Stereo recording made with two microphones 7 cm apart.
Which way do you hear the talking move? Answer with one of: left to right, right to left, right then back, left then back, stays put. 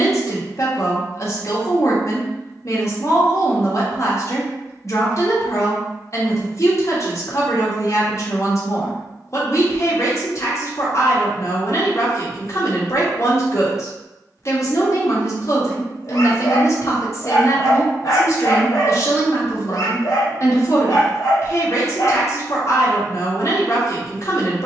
stays put.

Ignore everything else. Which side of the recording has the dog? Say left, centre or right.
left.